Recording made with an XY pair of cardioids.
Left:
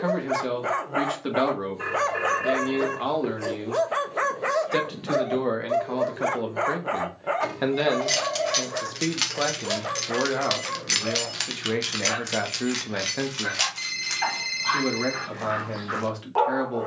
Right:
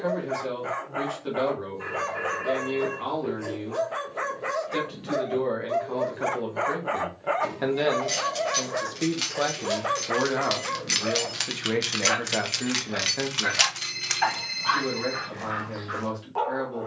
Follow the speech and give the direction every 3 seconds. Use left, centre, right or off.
left, left, left, centre, left, left.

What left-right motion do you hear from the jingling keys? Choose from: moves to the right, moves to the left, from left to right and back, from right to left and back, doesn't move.
moves to the right.